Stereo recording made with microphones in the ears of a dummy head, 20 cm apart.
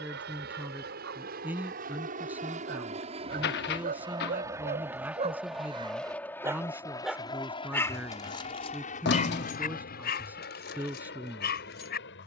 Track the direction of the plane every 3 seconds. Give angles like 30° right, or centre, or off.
50° right, 10° right, 20° left, 40° left.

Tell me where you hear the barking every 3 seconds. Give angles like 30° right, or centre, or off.
60° right, 40° right, 10° left, 50° left.